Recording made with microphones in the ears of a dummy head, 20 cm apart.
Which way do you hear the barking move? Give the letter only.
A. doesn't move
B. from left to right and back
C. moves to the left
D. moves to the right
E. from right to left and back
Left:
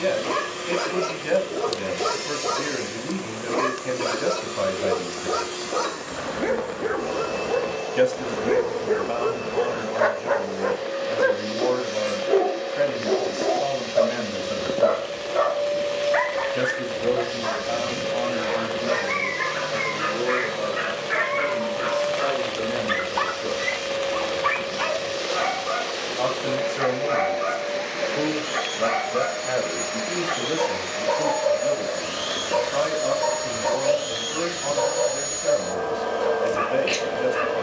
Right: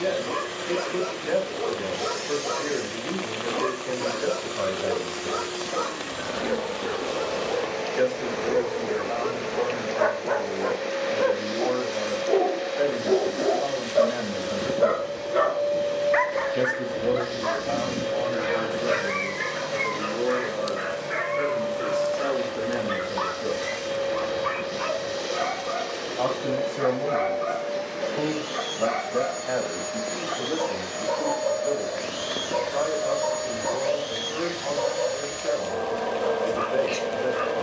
B.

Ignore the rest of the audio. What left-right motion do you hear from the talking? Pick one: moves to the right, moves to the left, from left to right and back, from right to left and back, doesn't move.
from left to right and back.